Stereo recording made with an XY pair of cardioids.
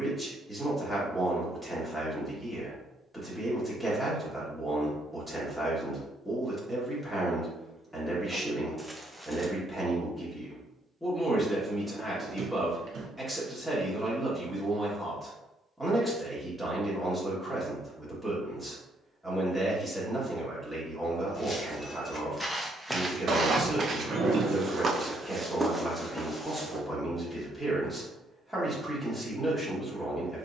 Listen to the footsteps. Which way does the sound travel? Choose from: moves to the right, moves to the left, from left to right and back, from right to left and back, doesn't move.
from left to right and back.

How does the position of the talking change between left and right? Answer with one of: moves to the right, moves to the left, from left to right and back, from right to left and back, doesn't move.
doesn't move.